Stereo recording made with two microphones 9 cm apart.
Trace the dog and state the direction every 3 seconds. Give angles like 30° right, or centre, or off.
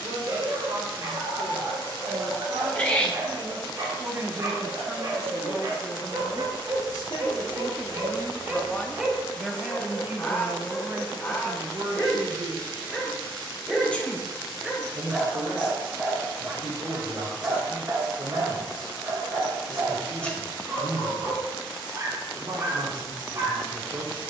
40° right, 40° right, 30° right, 10° left, centre, 20° right, 40° right, 40° right.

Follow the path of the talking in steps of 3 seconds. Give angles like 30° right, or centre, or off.
60° right, 20° right, 30° left, 30° right, 60° right, 60° right, 60° right, 60° right.